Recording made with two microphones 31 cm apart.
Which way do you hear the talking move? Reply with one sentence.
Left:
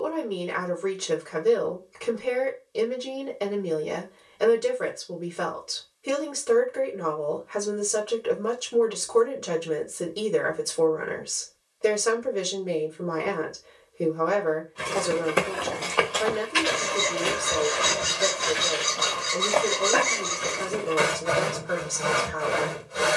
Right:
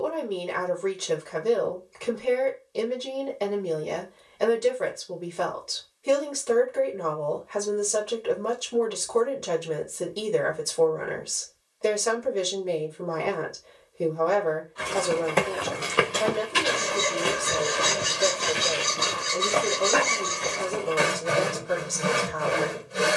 You can hear the talking stay put.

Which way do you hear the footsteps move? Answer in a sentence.
In this clip you hear the footsteps go right and come back.